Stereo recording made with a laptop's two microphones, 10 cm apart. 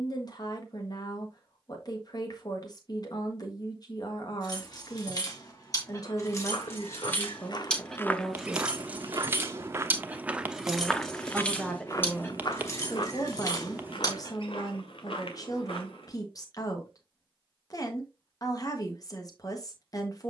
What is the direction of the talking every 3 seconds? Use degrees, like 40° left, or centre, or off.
50° left, 50° left, 20° left, centre, 30° left, 40° left, 40° left.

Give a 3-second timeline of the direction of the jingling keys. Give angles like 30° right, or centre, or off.
off, 40° left, 10° left, centre, 40° left, off, off.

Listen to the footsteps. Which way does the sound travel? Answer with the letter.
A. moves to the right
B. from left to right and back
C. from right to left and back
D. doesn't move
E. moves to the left
B.